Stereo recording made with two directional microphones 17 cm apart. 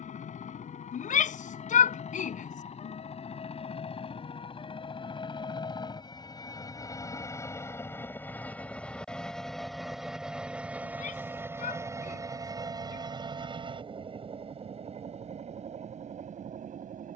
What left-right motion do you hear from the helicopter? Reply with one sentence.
In this clip you hear the helicopter move to the right.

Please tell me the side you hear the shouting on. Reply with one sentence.
In this clip you hear the shouting on the left.